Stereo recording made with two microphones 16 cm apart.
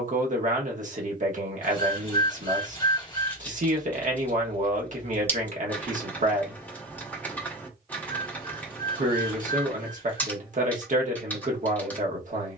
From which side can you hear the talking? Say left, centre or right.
right.